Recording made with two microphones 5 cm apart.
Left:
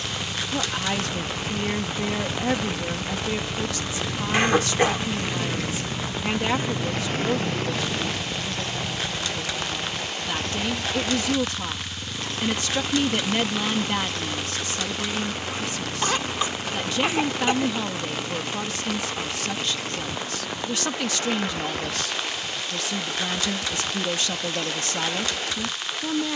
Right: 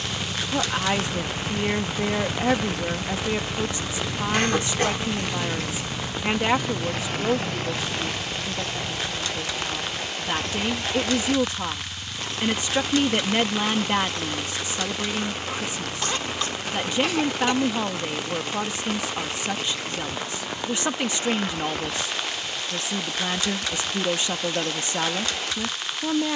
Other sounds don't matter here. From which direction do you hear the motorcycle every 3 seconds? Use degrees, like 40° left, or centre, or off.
30° right, centre, 40° left, 50° left, 60° left, 70° left, 70° left, 70° left, 70° left.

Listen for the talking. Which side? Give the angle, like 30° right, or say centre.
20° right.